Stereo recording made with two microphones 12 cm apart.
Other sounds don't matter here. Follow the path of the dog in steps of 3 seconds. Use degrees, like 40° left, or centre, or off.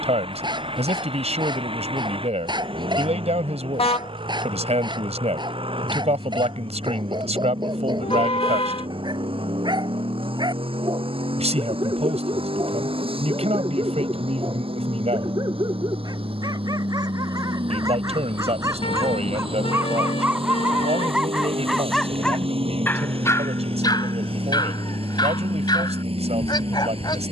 40° right, 40° right, 40° right, 40° right, 40° right, 30° right, 20° right, 10° left, 40° left.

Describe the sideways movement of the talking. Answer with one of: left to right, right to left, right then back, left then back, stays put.
stays put.